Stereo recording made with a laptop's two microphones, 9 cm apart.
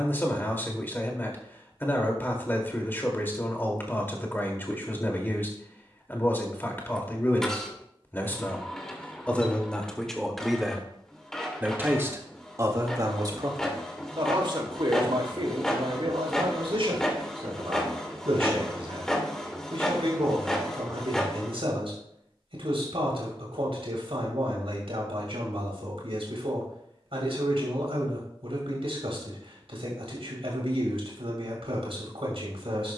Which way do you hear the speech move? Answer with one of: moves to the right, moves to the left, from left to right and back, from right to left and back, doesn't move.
moves to the right.